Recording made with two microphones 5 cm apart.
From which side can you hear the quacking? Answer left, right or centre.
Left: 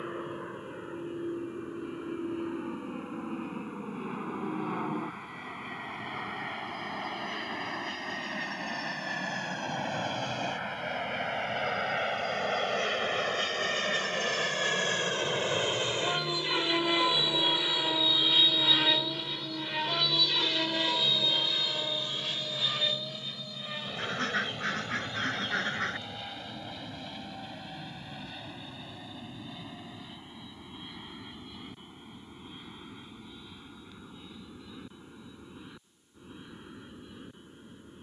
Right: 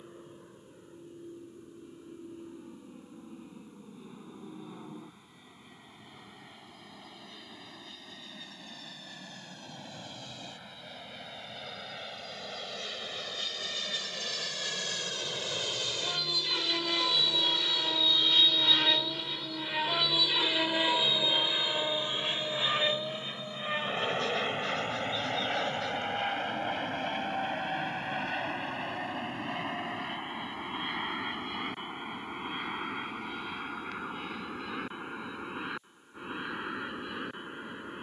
left.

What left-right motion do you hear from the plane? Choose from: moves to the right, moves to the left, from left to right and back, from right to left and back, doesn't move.
moves to the right.